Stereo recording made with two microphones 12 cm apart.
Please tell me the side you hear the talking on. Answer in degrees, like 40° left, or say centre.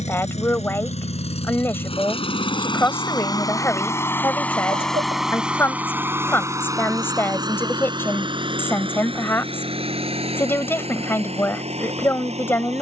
20° left.